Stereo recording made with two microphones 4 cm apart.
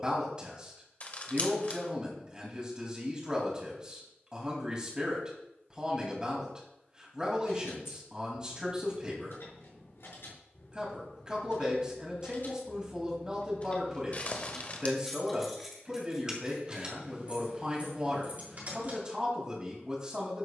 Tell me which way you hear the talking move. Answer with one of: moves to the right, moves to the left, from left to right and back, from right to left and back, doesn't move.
doesn't move.